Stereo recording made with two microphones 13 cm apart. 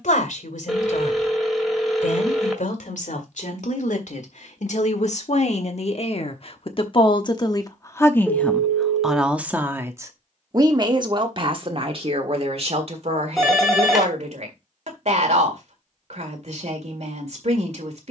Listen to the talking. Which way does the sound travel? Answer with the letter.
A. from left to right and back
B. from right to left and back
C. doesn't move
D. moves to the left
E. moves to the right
E.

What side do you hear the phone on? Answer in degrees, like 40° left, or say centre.
centre.